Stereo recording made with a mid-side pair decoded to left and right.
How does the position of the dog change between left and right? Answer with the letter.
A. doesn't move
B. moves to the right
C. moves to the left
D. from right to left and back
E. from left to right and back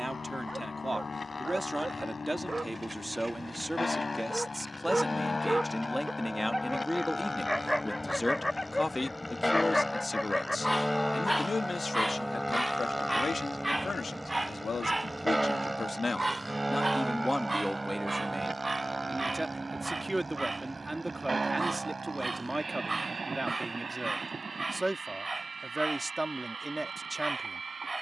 D.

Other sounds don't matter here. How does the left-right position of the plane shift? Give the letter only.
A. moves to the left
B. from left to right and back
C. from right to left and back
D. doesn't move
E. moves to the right
E.